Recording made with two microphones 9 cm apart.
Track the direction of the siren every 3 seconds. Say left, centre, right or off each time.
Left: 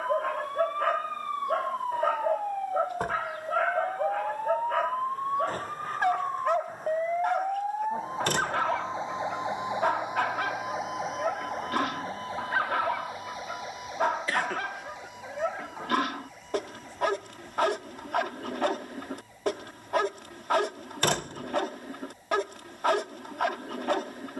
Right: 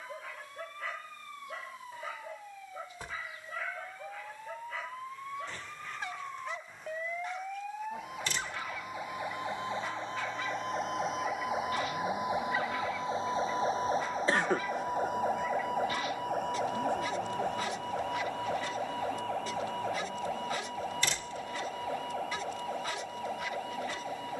left, left, left, centre, right, right, right, right.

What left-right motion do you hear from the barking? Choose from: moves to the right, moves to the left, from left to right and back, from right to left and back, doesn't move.
doesn't move.